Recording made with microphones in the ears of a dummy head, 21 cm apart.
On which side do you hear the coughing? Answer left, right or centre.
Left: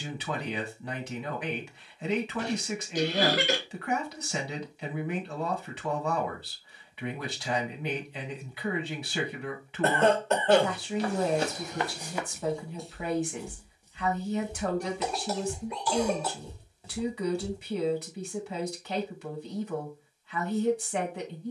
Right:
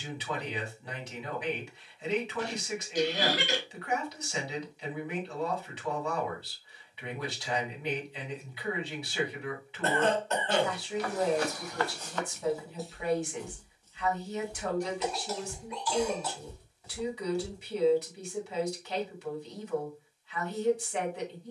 left.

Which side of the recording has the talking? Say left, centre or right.
left.